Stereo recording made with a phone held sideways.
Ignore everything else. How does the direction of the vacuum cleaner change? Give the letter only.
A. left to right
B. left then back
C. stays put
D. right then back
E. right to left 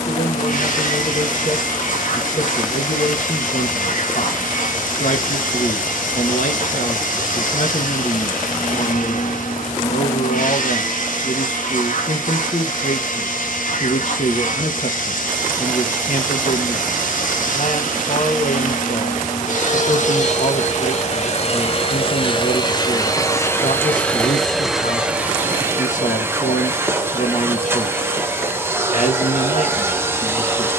A.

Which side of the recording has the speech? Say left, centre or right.
left.